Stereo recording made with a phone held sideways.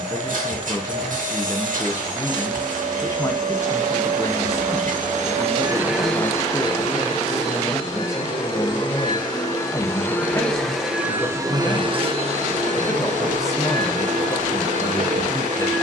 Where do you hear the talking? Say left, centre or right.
left.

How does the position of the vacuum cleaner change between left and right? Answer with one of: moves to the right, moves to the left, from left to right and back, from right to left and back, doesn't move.
from right to left and back.